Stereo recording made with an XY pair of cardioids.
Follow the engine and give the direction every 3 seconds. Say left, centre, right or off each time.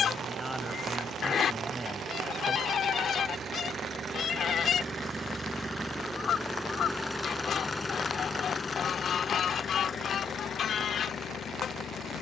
right, right, centre, left.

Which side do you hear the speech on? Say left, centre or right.
centre.